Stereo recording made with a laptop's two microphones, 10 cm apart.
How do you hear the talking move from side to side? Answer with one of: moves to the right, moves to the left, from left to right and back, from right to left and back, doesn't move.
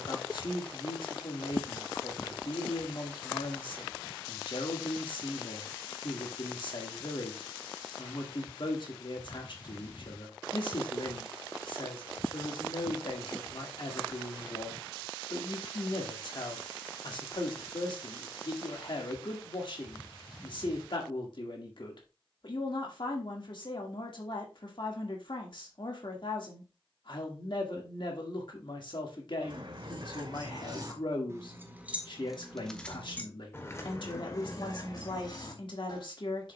doesn't move.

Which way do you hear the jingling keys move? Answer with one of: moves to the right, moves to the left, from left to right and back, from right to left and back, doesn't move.
moves to the left.